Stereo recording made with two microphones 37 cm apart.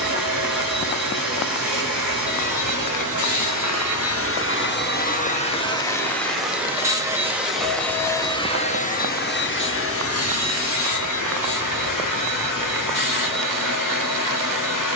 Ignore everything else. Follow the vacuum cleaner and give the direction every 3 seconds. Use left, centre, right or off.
left, left, centre, left, left.